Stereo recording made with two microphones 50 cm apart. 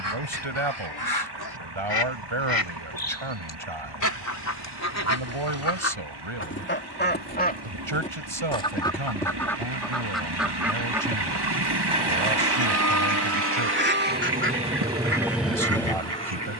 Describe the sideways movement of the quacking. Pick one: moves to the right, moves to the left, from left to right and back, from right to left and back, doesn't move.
moves to the right.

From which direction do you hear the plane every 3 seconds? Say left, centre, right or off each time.
right, right, right, right, right, centre.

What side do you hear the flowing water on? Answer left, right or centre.
right.